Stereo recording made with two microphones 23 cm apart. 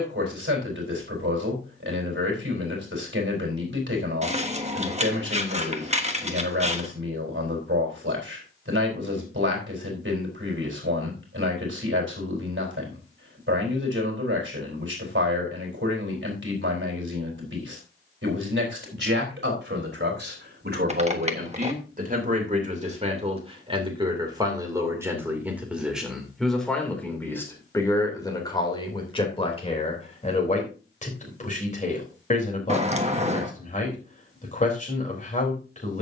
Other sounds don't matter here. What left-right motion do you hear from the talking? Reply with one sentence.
You can hear the talking move to the left.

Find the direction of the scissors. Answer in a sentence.
In this clip you hear the scissors on the right.